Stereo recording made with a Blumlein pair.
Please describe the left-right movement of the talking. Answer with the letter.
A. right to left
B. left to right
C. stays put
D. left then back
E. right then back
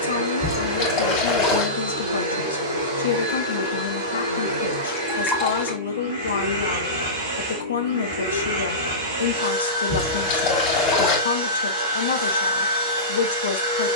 C.